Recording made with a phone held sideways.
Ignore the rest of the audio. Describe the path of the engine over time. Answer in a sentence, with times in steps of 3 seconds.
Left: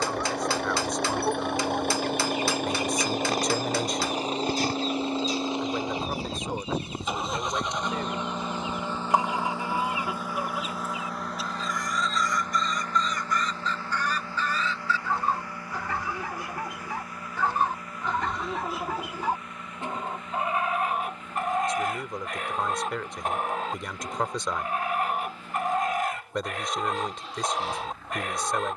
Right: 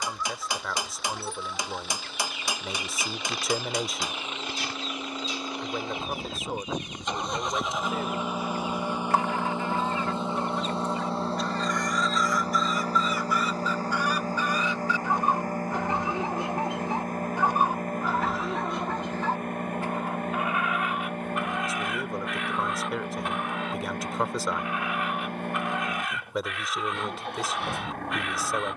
In this clip you hear the engine on the left from 0 s, in the centre from 6 s and on the right from 9 s.